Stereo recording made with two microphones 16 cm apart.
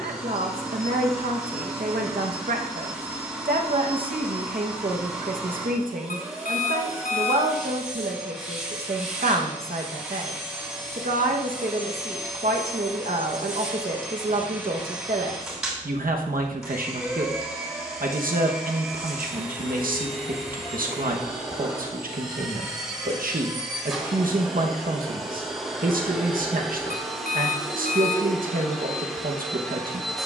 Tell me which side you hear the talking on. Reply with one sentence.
You can hear the talking on the right.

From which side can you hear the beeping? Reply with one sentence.
You can hear the beeping on the left.